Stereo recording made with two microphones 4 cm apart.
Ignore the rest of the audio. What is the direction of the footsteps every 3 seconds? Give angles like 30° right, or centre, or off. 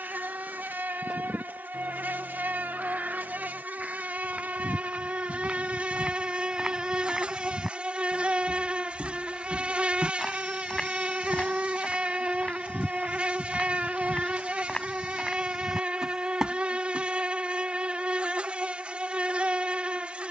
off, 20° right, 10° right, 20° left, 30° left, centre, off.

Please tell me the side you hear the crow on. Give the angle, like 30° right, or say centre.
20° right.